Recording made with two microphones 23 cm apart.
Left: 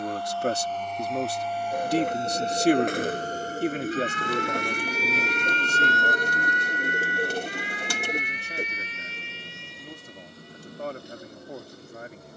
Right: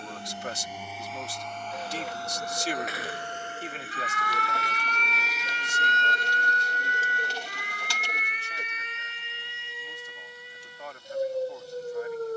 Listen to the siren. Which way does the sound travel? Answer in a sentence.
In this clip you hear the siren move to the right.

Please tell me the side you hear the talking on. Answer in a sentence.
You can hear the talking on the left.